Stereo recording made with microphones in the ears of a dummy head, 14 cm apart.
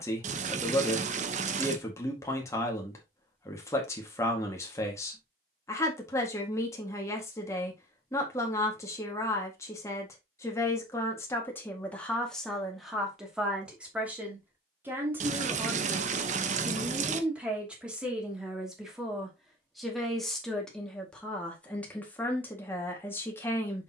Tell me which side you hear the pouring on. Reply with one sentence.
In this clip you hear the pouring on the right.